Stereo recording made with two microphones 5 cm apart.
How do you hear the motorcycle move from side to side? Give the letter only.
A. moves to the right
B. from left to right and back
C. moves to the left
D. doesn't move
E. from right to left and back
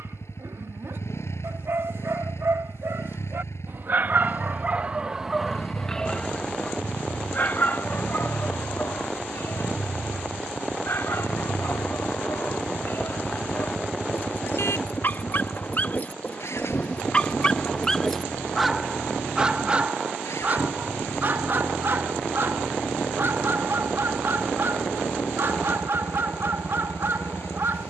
D.